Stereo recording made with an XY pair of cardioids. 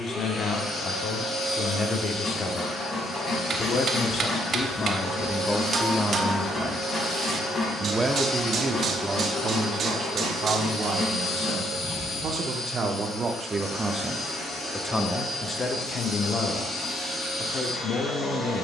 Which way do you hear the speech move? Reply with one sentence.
You can hear the speech go right and come back.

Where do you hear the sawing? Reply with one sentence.
In this clip you hear the sawing on the left.